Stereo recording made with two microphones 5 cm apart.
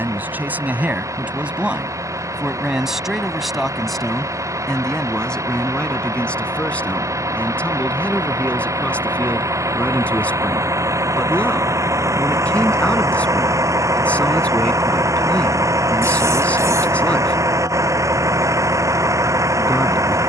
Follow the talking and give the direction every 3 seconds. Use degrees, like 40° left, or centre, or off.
20° right, 10° left, 20° left, 20° left, 20° left, 20° left, 20° left.